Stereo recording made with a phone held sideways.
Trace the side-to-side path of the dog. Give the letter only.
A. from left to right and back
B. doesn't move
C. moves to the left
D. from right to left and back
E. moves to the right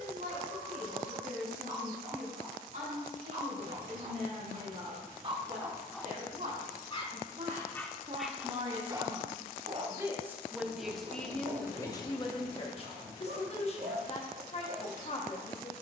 D.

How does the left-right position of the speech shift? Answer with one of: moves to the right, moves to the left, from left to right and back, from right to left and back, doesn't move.
moves to the left.